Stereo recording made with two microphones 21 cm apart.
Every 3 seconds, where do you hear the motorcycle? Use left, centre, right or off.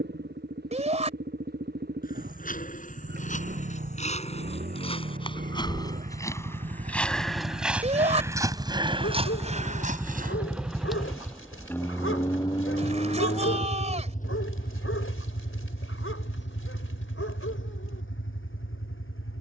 right, right, right, centre, left, left, left.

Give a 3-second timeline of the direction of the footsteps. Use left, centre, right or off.
left, left, centre, right, off, off, off.